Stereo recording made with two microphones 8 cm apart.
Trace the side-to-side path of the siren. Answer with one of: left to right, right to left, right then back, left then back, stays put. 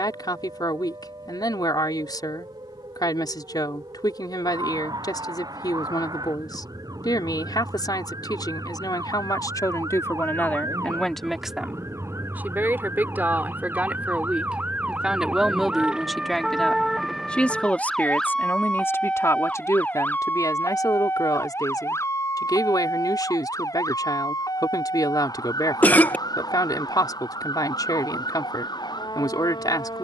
right to left.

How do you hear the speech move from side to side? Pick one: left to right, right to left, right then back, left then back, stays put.
right then back.